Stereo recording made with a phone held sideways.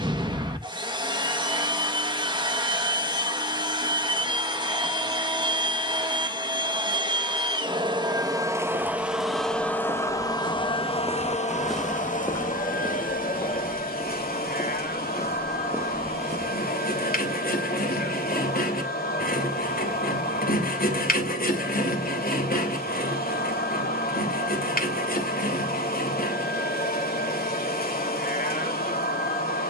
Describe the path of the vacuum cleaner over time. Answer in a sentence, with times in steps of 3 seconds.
In this clip you hear the vacuum cleaner on the right from 0 s and on the left from 9 s.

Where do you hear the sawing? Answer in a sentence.
In this clip you hear the sawing on the left.